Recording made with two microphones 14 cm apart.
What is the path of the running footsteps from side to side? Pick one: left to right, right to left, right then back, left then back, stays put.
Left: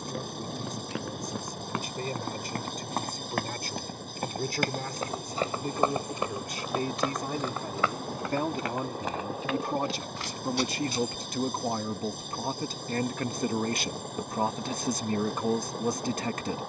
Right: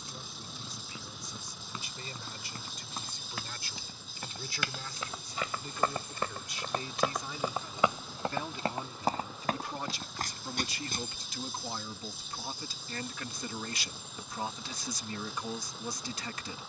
left to right.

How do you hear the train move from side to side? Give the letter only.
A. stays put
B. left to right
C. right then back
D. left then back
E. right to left
A.